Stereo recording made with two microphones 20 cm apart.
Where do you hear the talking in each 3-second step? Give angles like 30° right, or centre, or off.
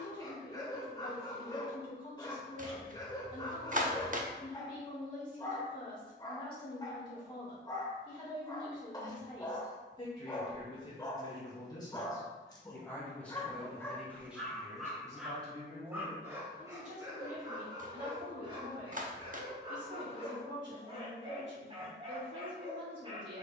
30° left, 30° left, 30° left, 20° left, centre, 30° right, 60° right, 70° right.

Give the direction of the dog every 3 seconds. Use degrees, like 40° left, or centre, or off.
20° left, 20° left, 20° left, 20° left, 10° left, 10° right, 30° right, 30° right.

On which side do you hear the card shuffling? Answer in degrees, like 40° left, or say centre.
40° right.